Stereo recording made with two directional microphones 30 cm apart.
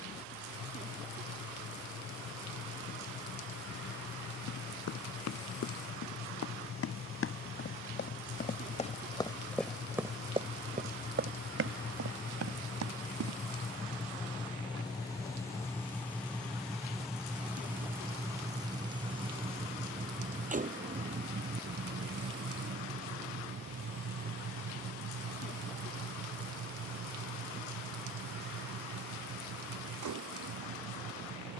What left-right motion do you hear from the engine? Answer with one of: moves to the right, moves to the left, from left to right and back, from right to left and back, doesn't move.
moves to the right.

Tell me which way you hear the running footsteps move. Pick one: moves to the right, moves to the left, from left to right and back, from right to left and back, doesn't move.
moves to the right.